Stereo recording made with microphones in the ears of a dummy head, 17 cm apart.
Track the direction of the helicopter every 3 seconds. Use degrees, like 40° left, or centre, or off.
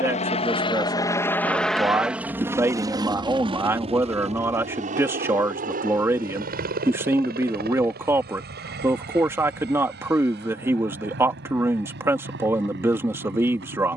10° left, 30° right, 50° right, 50° right, 60° right.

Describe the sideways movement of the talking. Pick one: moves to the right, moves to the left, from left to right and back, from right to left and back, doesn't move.
doesn't move.